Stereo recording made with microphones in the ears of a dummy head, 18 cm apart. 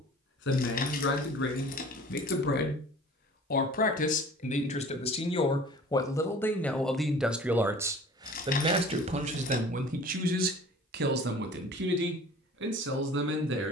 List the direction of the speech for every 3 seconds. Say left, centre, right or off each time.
left, left, centre, right, right.